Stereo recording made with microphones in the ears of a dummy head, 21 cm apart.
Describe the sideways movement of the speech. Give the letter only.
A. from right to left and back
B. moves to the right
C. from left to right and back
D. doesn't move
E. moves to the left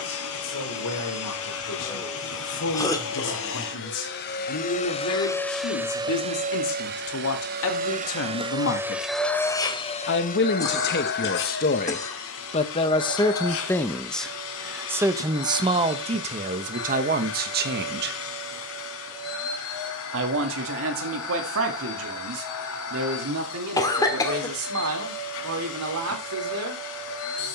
B.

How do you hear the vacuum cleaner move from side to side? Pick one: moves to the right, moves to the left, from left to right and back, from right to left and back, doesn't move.
from left to right and back.